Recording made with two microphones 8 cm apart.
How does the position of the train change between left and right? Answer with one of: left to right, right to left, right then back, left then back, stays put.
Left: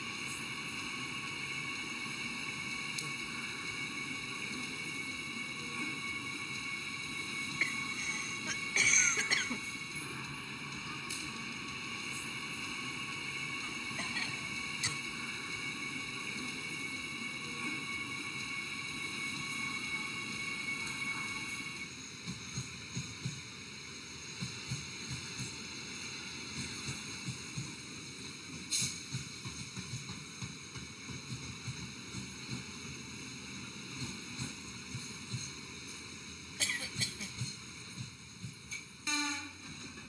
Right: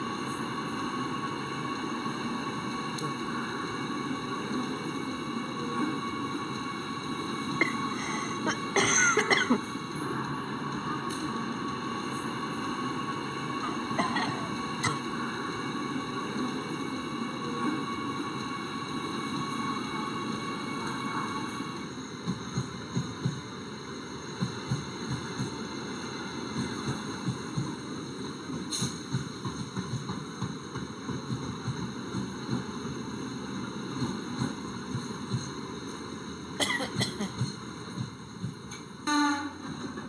stays put.